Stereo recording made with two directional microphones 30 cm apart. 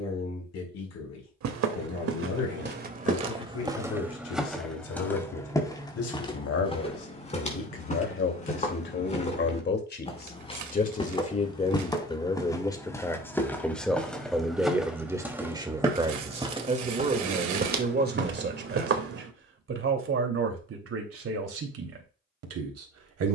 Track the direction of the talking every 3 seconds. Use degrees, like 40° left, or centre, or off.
60° left, 60° left, 50° left, 30° left, 10° left, 20° right, 40° right, 50° right.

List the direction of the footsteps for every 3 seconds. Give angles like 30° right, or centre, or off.
50° right, centre, 20° left, 20° left, 10° left, 20° right, 40° right, off.